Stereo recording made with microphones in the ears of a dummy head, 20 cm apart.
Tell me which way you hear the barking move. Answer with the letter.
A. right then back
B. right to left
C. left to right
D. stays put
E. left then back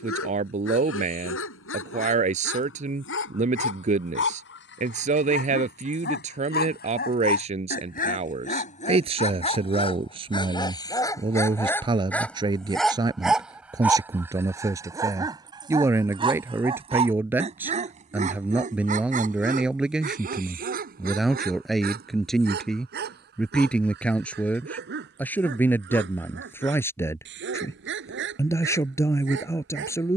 C.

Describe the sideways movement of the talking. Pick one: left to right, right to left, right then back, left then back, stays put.
right to left.